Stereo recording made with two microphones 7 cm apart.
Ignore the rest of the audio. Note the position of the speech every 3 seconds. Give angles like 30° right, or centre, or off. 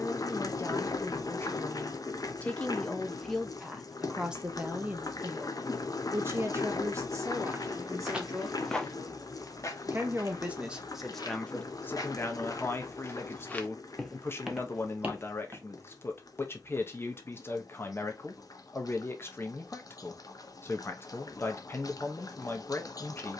30° left, 10° right, 40° right, 10° right, 30° left, 30° left, 30° left, 30° left.